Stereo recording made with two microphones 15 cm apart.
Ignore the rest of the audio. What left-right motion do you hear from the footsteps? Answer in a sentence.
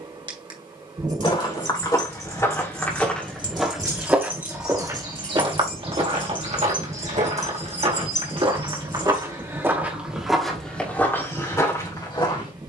In this clip you hear the footsteps go right and come back.